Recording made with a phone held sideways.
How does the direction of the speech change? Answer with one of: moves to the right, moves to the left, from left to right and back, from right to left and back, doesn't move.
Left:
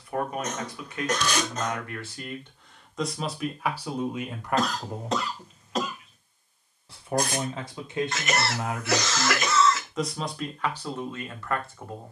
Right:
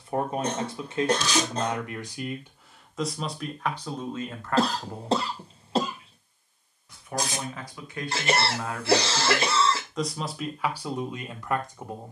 from right to left and back.